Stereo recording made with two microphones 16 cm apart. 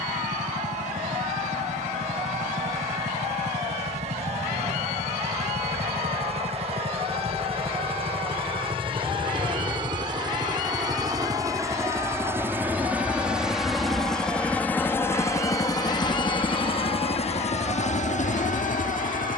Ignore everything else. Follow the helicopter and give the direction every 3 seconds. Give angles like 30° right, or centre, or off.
50° right, 40° right, 40° right, 30° right, centre, 30° left, 50° left.